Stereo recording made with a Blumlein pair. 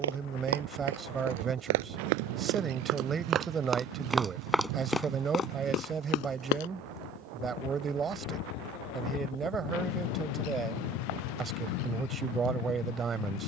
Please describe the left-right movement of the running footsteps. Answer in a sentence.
You can hear the running footsteps move from right to left.